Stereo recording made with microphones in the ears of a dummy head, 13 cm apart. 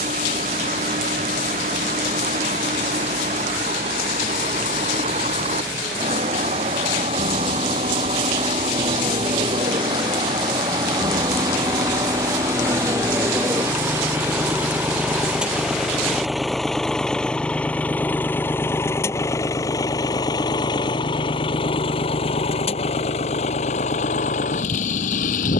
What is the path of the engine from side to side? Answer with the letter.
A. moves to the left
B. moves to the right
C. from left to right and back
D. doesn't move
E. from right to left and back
A.